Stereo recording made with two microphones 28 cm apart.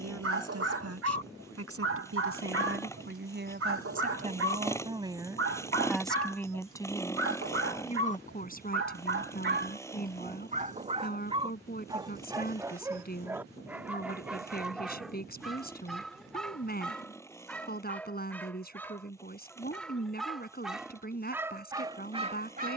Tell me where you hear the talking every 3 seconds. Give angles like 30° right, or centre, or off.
60° right, 30° right, 20° left, 30° left, 30° left, 30° left, 30° left, 30° left.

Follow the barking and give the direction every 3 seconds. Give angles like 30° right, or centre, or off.
50° right, 50° right, 50° right, 30° right, 10° right, centre, centre, 20° right.